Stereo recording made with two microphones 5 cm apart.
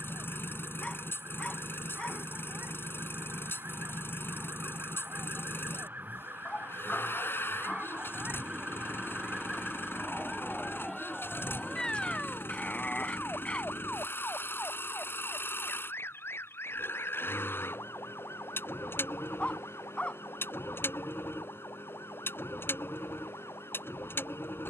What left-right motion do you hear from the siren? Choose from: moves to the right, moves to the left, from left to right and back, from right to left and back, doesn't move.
moves to the left.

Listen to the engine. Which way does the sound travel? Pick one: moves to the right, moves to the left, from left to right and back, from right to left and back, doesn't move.
doesn't move.